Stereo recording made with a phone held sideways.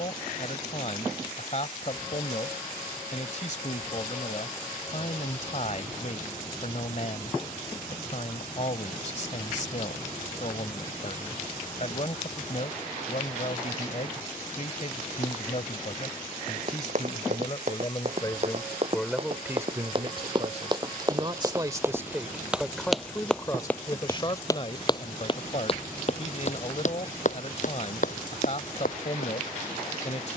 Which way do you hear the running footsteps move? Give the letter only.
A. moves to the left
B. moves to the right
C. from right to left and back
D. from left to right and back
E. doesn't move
A.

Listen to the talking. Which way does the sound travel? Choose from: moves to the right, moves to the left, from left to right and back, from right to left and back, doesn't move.
from left to right and back.